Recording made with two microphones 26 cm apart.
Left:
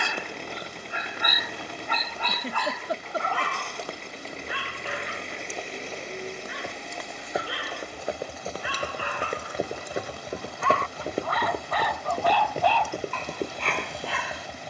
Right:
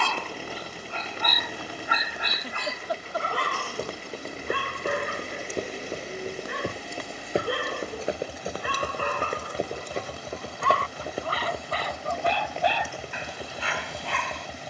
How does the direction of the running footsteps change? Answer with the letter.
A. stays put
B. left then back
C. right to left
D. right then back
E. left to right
C.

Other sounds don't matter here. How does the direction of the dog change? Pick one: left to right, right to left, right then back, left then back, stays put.
right then back.